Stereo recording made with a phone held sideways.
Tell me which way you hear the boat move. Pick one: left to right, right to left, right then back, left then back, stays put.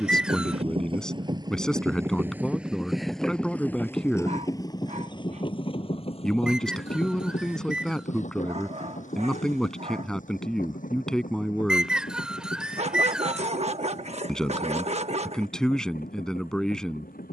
right to left.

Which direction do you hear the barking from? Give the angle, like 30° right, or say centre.
50° right.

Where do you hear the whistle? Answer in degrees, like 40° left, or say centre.
10° right.